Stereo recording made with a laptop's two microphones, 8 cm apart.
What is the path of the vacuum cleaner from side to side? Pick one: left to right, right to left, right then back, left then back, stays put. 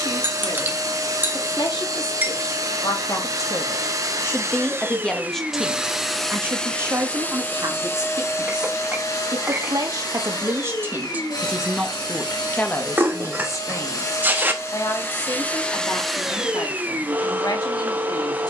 left then back.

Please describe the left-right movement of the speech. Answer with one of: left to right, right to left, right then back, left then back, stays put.
right then back.